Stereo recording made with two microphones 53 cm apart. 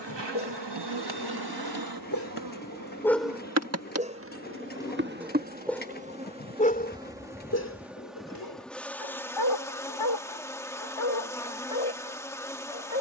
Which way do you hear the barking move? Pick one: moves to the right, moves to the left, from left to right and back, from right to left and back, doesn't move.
from left to right and back.